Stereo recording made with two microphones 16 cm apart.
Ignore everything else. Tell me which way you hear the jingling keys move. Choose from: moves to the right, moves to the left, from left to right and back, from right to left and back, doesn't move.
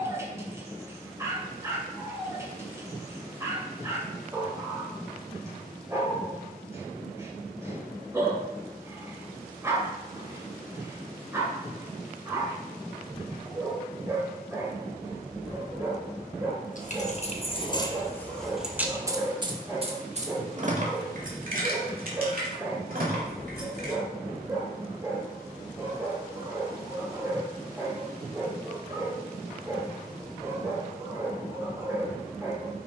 moves to the right.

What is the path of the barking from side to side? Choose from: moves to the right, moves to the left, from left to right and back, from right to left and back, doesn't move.
doesn't move.